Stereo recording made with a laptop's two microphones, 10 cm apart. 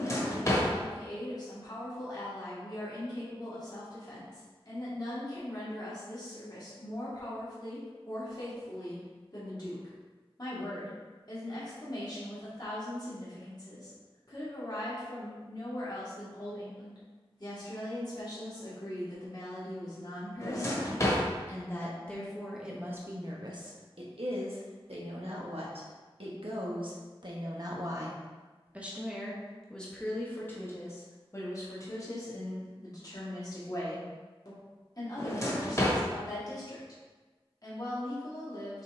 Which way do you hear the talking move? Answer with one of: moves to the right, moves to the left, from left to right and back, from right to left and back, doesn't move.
from left to right and back.